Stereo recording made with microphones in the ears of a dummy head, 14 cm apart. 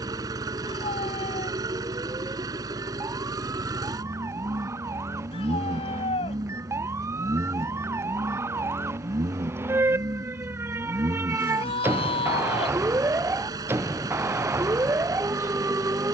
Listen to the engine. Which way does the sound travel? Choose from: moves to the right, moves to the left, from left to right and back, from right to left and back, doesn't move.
doesn't move.